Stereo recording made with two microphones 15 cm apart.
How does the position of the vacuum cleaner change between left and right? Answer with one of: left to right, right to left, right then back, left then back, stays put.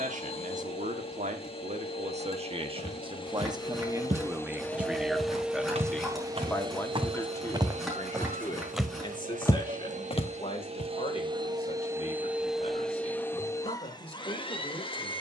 right then back.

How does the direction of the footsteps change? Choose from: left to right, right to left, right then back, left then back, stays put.
right to left.